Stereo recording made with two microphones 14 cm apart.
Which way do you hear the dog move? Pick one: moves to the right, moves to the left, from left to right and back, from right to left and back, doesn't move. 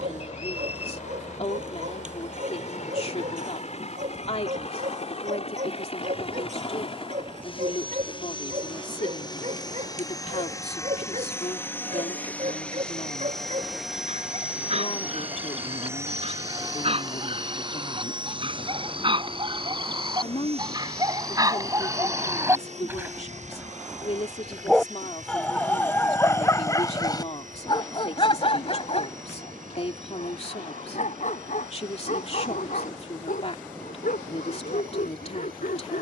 moves to the left.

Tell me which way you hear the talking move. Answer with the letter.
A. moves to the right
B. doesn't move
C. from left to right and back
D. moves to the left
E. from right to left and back
B.